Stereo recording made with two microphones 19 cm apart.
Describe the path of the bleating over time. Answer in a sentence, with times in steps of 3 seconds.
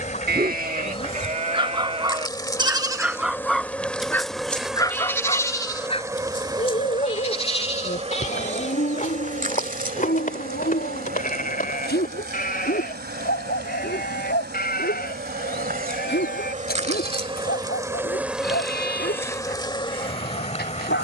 You can hear the bleating on the right from 0 s, in the centre from 3 s and on the left from 6 s.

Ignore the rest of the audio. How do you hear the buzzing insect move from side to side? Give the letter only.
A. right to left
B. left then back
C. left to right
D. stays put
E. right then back
E.